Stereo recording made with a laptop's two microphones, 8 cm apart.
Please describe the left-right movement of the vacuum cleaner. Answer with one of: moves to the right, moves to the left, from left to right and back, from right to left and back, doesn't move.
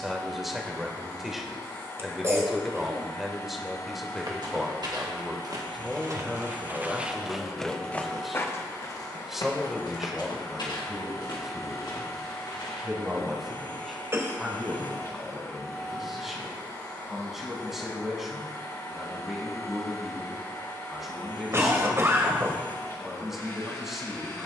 doesn't move.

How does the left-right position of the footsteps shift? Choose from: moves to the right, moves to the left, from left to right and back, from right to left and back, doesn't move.
moves to the left.